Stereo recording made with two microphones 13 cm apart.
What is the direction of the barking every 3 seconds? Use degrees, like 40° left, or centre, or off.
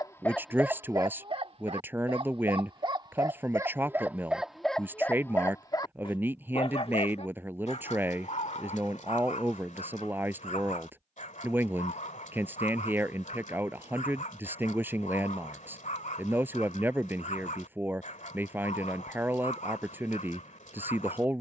20° right, centre, 60° left, 70° left, 70° left, 70° left, 70° left.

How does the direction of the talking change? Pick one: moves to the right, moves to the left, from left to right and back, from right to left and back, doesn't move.
doesn't move.